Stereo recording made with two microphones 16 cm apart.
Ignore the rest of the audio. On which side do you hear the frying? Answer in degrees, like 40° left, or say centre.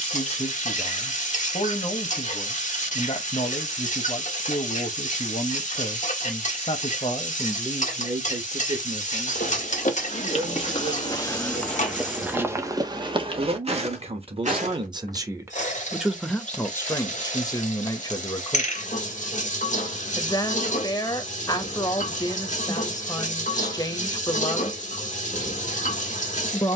50° left.